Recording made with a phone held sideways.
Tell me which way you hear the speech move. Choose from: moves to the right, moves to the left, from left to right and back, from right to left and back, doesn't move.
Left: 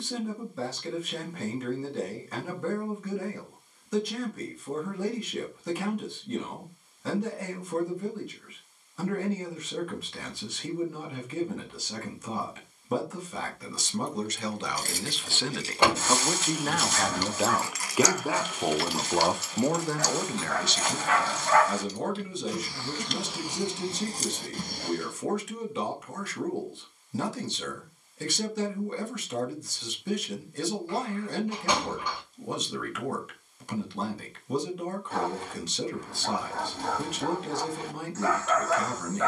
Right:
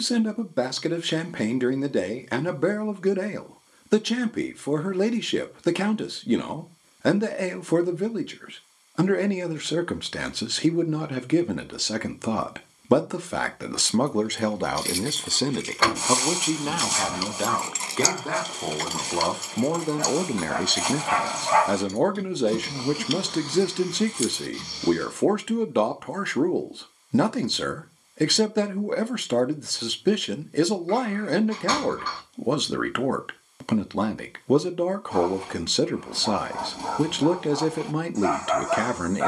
from right to left and back.